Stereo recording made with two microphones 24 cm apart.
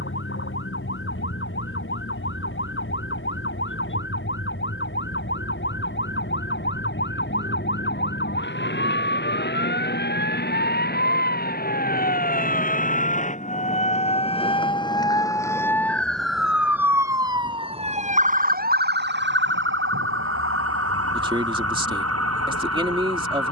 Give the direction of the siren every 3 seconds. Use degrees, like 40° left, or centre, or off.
60° left, 60° left, 50° left, 50° left, 30° left, centre, 50° right, 70° right.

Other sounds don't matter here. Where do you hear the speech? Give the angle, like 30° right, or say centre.
20° right.